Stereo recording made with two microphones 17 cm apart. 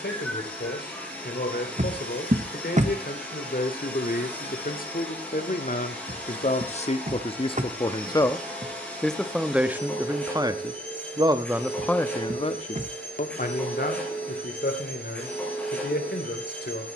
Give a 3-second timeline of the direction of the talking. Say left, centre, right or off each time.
left, left, left, centre, left, left.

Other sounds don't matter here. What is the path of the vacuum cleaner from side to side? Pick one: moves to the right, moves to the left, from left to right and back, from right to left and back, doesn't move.
doesn't move.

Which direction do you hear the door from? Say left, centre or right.
right.